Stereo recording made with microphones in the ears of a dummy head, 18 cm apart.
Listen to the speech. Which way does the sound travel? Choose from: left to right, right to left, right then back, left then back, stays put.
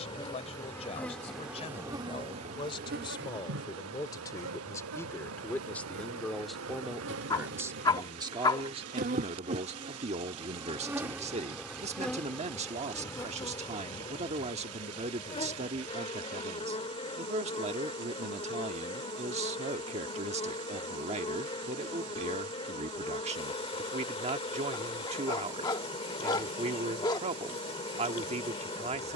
left to right.